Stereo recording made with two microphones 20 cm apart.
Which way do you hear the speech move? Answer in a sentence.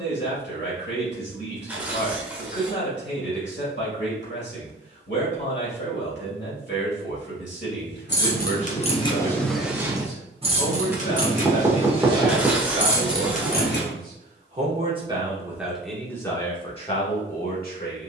In this clip you hear the speech go right and come back.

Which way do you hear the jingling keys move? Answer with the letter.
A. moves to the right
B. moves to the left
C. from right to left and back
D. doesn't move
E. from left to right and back
E.